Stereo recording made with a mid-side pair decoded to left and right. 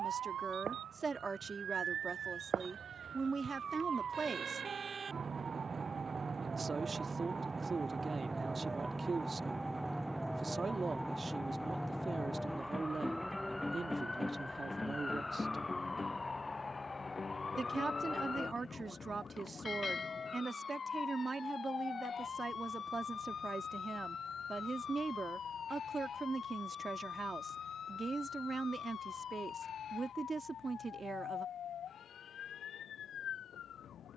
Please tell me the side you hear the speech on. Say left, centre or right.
right.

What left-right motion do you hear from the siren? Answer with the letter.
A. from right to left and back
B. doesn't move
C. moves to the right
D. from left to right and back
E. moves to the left
E.